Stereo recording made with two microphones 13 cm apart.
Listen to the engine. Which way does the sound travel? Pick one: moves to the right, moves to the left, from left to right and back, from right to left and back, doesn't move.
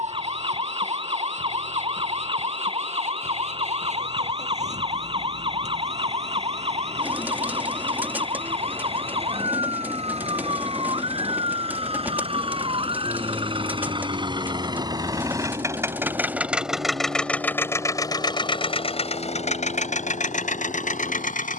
moves to the left.